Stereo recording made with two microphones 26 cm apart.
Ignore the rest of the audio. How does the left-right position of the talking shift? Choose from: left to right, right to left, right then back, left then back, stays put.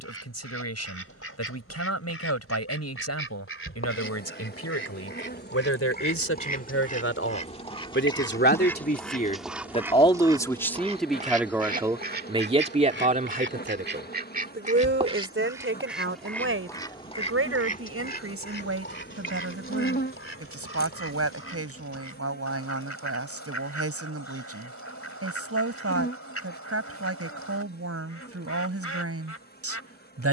left to right.